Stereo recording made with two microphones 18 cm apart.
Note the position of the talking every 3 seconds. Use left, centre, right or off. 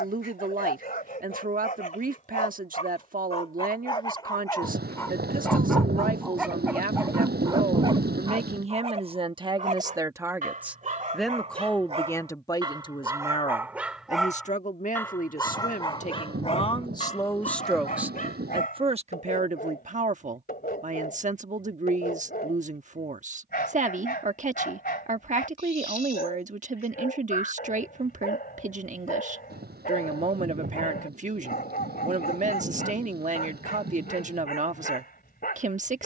right, right, right, centre, left, left, right, right, right, right, right, right.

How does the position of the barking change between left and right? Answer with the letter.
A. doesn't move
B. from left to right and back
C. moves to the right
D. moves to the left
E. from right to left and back
B.